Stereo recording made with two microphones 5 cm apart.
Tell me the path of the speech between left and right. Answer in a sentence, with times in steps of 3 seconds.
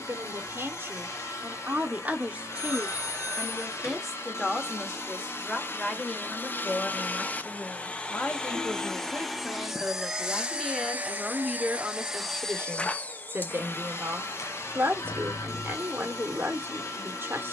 You can hear the speech on the right from 0 s, in the centre from 3 s, on the left from 6 s, in the centre from 9 s and on the right from 12 s.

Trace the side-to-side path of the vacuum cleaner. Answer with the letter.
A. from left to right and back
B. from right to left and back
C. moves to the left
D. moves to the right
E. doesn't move
A.